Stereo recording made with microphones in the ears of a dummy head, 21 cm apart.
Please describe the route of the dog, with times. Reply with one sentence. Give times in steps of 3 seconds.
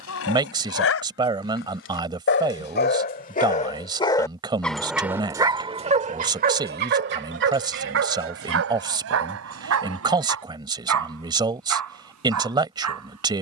In this clip you hear the dog on the left from 0 s, in the centre from 3 s and on the right from 6 s.